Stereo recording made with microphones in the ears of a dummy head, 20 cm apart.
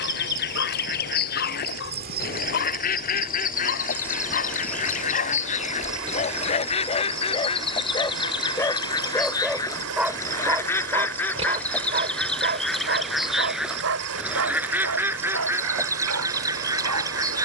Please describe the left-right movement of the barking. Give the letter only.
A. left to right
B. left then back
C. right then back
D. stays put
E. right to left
A.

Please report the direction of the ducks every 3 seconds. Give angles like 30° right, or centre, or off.
50° left, 40° left, 30° left, 10° left, centre, 10° right.